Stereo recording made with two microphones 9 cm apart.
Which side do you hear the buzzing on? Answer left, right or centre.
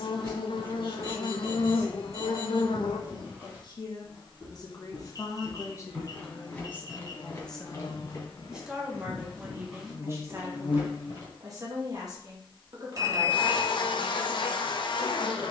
left.